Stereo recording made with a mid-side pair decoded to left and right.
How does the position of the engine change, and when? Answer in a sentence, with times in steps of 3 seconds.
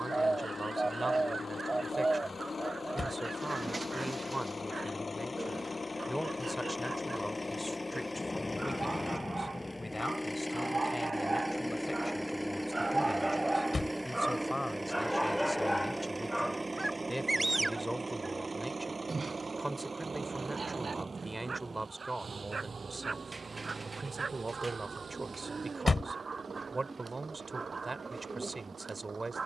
In this clip you hear the engine on the left from 0 s, in the centre from 9 s and on the right from 15 s.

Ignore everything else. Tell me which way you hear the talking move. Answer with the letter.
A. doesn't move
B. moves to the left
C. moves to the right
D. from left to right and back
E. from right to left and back
E.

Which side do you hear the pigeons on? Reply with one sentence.
You can hear the pigeons on the right.